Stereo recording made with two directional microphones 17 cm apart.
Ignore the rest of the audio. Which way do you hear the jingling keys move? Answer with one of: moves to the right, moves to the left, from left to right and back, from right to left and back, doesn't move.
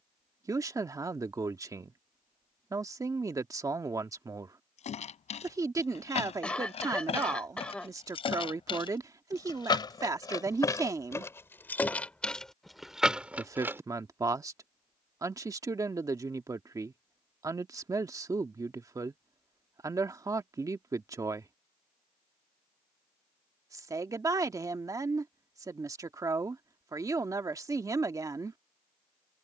moves to the right.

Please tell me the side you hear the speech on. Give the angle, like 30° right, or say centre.
20° right.